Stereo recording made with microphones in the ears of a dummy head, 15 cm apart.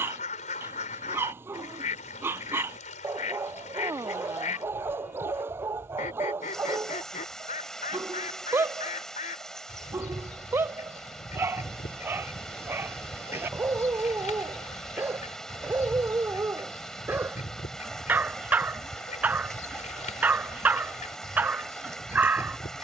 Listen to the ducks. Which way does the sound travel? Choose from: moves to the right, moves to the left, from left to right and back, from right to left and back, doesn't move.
doesn't move.